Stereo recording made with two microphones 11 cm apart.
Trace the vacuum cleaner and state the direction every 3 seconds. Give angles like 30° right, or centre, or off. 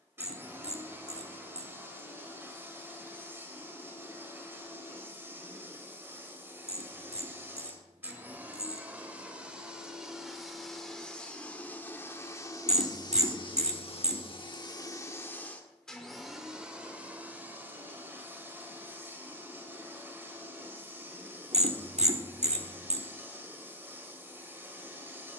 20° right, 20° right, 20° right, centre, 40° left, centre, 20° right, 20° right, 20° right.